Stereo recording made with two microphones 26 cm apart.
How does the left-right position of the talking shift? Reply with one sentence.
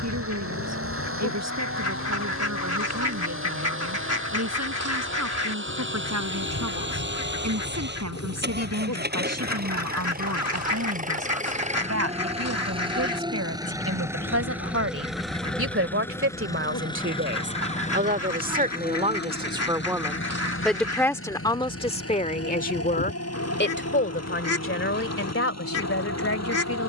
You can hear the talking move to the left.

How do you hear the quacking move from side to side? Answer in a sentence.
In this clip you hear the quacking stay put.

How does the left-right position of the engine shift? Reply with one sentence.
You can hear the engine travel towards the left.